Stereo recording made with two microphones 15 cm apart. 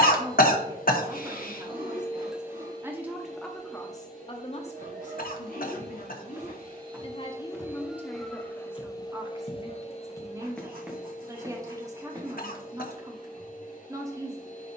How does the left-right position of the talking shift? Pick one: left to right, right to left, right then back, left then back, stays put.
left then back.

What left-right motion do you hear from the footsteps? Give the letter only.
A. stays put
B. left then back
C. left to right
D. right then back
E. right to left
B.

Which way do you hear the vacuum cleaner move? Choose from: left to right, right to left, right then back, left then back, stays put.
right then back.